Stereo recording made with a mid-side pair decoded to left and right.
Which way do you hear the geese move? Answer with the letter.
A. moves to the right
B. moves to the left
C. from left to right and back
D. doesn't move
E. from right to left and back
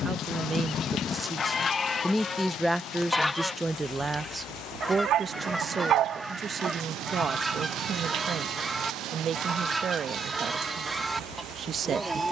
A.